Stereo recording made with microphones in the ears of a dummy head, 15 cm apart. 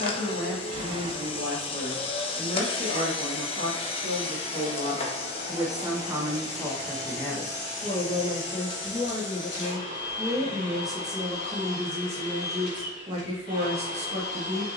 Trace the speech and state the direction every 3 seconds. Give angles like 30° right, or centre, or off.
50° right, 40° right, 20° left, centre, 30° right.